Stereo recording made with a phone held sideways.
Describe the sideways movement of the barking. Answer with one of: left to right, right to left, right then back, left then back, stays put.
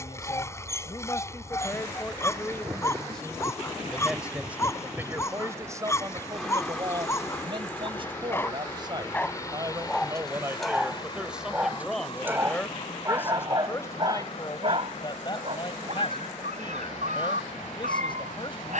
left to right.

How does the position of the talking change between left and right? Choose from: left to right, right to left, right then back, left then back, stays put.
right then back.